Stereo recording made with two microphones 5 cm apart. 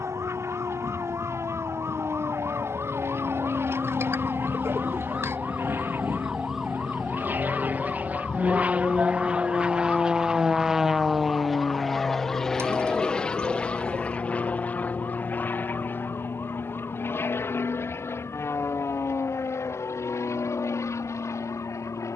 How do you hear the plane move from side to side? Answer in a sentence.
You can hear the plane move from right to left.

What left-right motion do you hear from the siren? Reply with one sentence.
You can hear the siren move from right to left.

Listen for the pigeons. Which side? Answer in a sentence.
In this clip you hear the pigeons on the right.